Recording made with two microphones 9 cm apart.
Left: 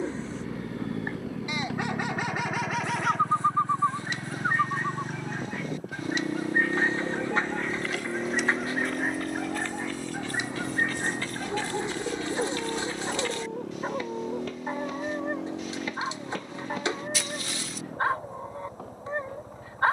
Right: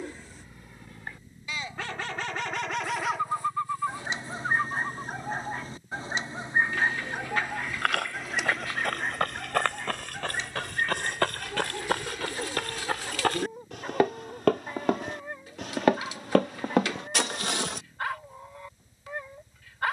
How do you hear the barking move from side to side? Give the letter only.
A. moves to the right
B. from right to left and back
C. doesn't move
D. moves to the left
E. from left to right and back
E.